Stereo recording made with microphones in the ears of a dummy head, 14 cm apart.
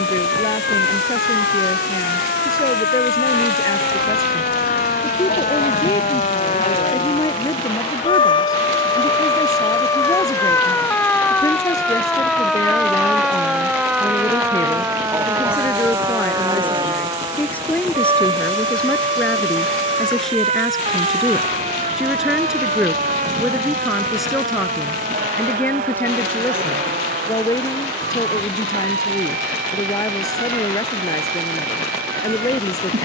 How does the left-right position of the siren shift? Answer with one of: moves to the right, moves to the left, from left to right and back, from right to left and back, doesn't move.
moves to the right.